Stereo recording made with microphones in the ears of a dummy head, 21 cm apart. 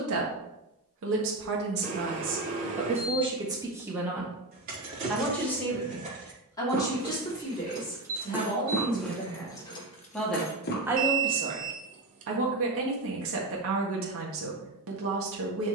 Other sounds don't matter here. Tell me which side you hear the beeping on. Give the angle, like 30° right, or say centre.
30° right.